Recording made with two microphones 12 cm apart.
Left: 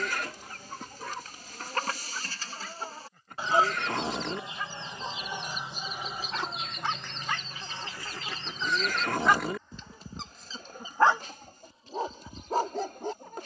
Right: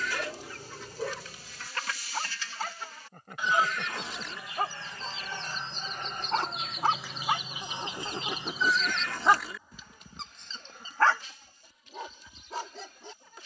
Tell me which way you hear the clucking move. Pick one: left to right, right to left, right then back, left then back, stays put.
right then back.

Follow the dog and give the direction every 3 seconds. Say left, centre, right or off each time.
right, right, right, centre, left.